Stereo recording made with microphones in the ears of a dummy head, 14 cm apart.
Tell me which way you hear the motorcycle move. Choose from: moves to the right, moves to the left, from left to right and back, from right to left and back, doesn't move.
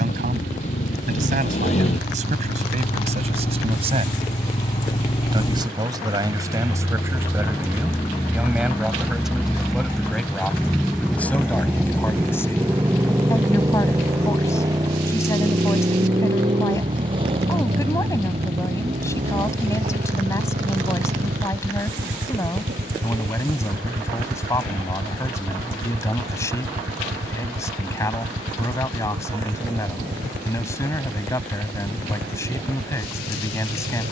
moves to the right.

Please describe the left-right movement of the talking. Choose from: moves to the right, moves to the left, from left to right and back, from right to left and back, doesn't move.
moves to the left.